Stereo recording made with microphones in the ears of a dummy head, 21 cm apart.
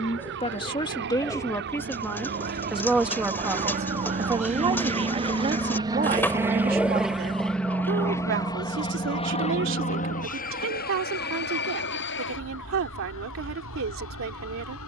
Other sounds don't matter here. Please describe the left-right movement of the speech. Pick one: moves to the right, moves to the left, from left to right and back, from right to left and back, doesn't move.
moves to the right.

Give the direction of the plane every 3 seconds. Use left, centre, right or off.
right, right, centre, left, left.